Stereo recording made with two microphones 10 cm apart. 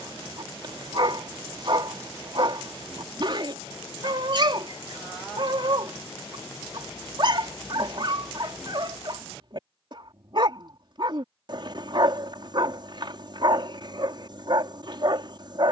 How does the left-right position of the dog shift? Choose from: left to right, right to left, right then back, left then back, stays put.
stays put.